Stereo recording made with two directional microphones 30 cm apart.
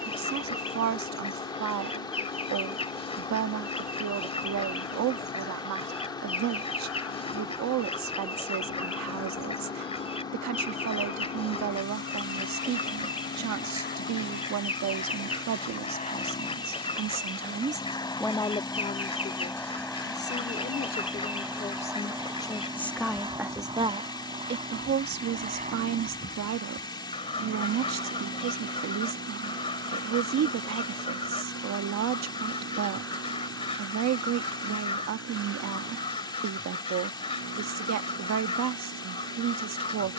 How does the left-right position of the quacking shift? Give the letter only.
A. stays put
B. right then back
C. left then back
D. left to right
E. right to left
A.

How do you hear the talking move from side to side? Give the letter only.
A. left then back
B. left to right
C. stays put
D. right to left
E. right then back
A.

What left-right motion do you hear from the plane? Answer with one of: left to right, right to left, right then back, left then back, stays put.
left to right.